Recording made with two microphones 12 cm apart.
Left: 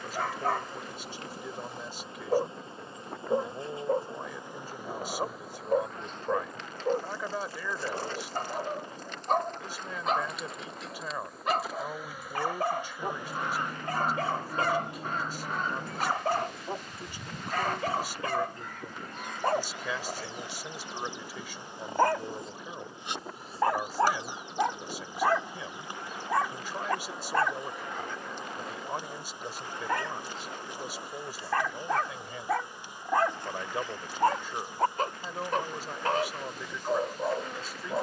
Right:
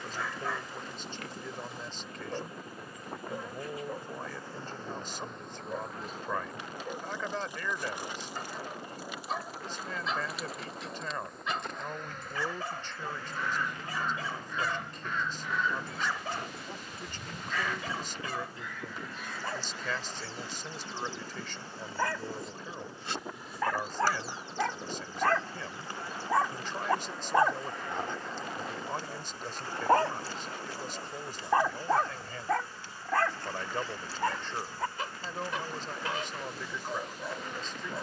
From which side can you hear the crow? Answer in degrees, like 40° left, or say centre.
40° left.